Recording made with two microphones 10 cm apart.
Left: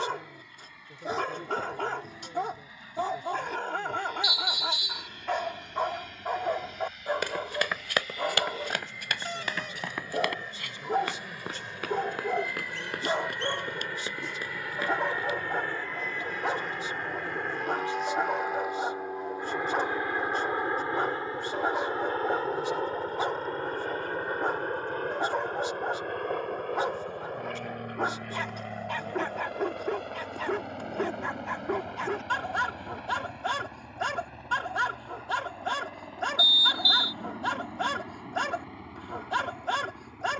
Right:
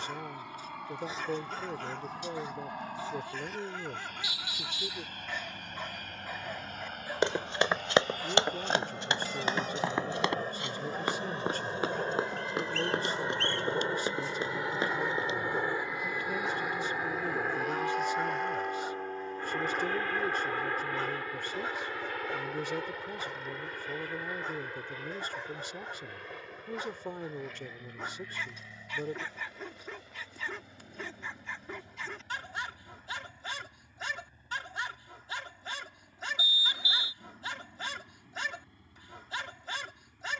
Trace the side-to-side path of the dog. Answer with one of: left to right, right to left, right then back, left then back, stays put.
stays put.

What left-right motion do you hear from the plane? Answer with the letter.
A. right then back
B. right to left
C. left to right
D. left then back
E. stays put
B.